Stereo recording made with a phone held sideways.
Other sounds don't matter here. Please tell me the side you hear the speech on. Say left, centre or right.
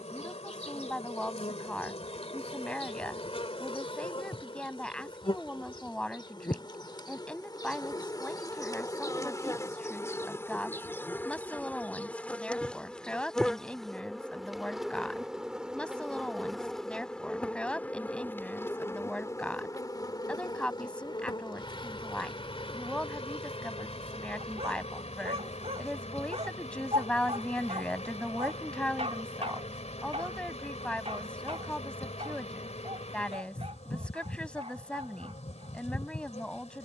centre.